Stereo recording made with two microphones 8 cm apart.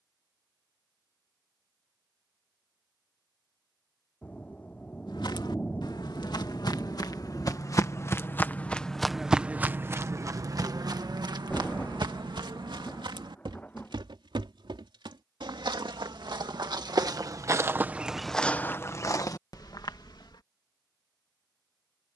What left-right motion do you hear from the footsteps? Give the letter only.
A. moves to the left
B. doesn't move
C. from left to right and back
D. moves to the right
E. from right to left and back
C.